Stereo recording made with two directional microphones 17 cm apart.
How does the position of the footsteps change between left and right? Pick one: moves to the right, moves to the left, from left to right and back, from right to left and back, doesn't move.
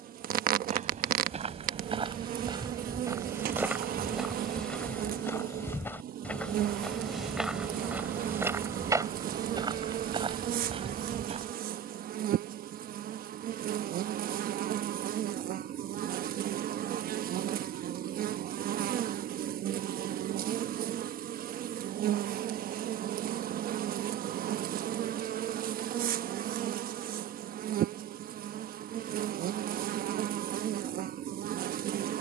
from right to left and back.